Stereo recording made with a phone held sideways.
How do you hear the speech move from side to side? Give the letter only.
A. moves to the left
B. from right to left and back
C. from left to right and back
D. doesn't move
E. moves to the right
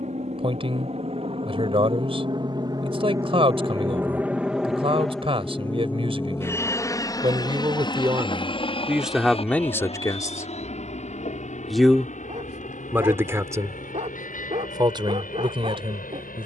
B.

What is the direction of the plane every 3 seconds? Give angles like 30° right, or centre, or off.
40° right, 10° right, 20° left, 40° left, 50° left, 60° left.